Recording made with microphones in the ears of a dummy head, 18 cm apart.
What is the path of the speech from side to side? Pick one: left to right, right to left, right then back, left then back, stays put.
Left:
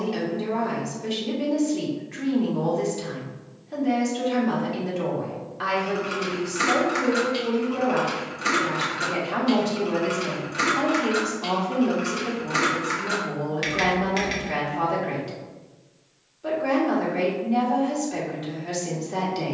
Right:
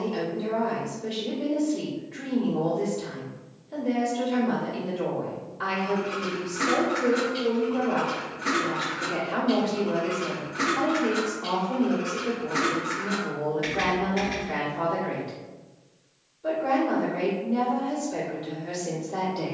stays put.